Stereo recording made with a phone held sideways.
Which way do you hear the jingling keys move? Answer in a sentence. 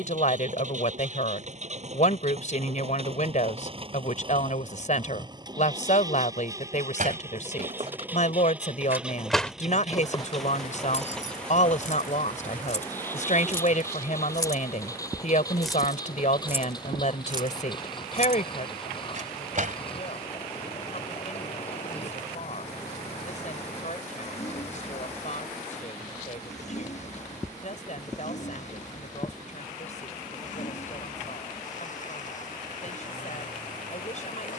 In this clip you hear the jingling keys go left and come back.